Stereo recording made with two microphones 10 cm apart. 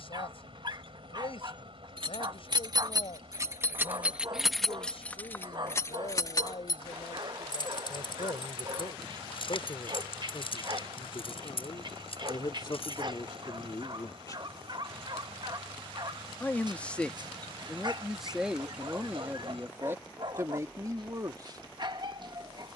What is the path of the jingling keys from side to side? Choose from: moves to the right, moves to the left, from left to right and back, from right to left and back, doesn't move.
moves to the left.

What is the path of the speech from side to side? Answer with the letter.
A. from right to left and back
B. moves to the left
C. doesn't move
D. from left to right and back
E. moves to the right
E.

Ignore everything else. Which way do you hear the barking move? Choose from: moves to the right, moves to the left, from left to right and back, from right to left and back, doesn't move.
doesn't move.